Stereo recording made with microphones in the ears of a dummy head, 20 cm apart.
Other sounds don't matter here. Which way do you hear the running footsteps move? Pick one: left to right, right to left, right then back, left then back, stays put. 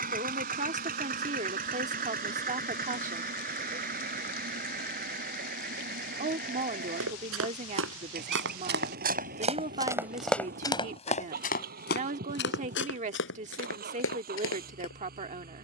right to left.